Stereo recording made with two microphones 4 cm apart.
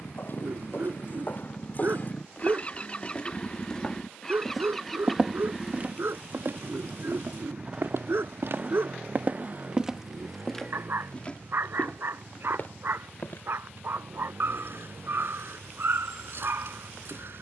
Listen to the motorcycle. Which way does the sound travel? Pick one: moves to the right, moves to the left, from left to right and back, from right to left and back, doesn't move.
moves to the right.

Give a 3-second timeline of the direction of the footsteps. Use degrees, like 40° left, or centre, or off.
40° left, centre, 60° right, 10° left, 50° left, off.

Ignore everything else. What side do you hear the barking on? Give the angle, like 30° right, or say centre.
60° right.